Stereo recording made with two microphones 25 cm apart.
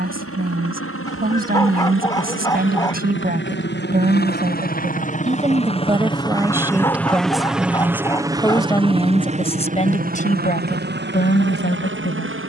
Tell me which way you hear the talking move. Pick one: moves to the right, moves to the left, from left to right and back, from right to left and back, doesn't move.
moves to the left.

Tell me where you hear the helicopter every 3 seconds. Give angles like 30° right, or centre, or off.
60° left, 40° left, centre, 40° right.